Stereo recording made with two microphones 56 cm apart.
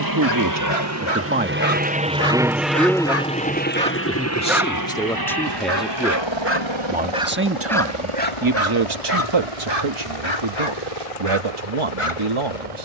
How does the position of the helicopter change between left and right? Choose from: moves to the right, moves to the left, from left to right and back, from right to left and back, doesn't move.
moves to the left.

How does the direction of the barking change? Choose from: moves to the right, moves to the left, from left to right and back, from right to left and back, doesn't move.
from left to right and back.